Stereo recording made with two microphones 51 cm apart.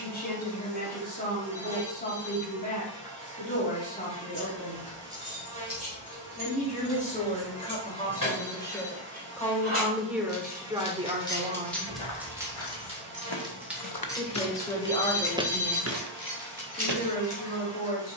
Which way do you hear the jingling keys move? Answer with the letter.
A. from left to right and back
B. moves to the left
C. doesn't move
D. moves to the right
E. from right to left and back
A.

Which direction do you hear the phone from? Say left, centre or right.
right.